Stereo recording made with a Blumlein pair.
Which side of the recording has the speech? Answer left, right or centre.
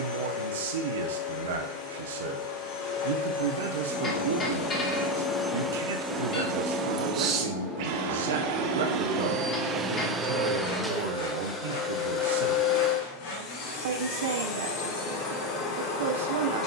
right.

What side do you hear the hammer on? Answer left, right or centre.
left.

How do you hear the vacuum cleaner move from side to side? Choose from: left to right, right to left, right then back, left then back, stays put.
right then back.